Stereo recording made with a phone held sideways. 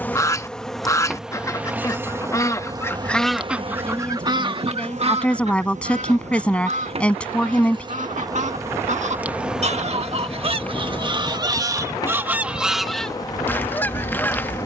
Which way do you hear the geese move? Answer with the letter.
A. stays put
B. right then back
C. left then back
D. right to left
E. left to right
B.